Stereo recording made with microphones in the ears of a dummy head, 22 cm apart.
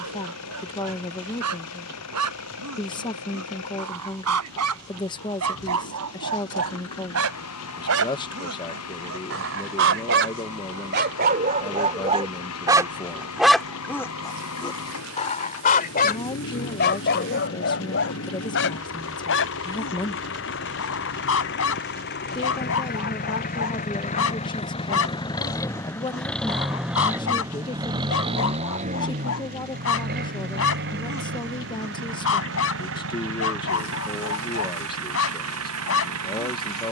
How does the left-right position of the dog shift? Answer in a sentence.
In this clip you hear the dog travel towards the left.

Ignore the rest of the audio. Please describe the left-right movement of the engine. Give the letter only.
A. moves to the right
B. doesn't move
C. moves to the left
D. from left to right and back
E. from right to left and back
A.